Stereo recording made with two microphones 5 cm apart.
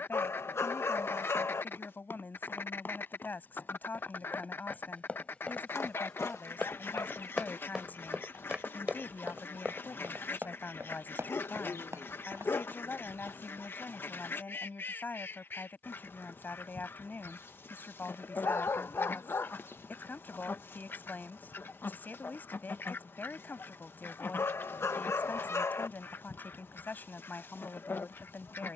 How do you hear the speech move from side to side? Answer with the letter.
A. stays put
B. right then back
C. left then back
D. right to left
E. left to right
A.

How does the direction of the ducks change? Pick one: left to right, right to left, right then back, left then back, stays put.
stays put.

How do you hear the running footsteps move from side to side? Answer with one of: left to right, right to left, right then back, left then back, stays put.
left to right.